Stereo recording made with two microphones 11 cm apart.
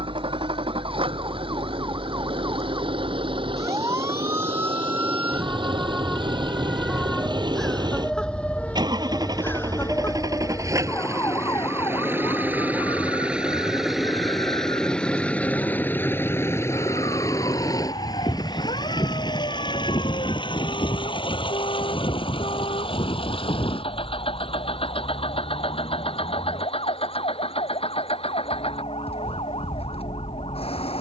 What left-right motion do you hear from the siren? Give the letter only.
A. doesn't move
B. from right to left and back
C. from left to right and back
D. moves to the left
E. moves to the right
D.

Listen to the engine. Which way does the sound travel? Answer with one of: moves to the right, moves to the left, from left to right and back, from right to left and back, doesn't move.
moves to the left.